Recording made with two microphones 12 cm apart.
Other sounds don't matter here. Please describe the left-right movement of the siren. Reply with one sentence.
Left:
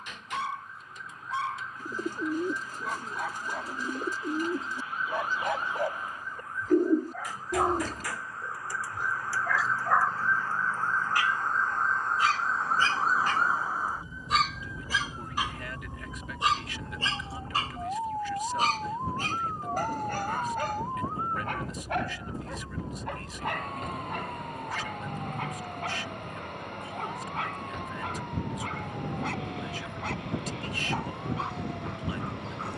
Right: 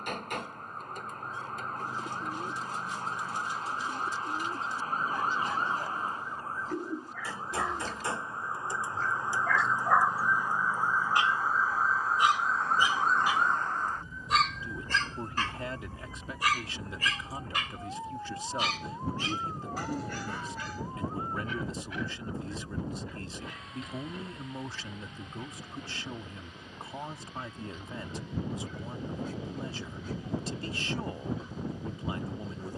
In this clip you hear the siren go from the right side to the left.